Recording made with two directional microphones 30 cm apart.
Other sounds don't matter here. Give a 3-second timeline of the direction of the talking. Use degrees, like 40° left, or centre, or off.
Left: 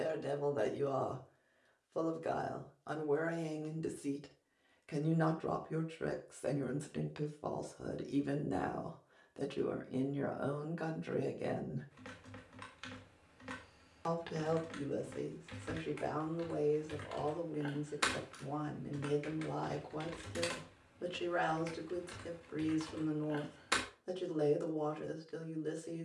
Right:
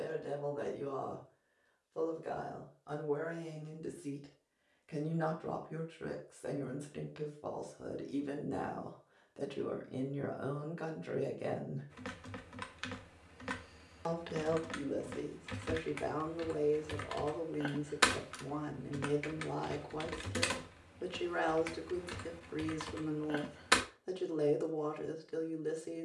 50° left, 40° left, 30° left, 10° left, 10° right, 10° right, 10° right, 10° right, 10° right.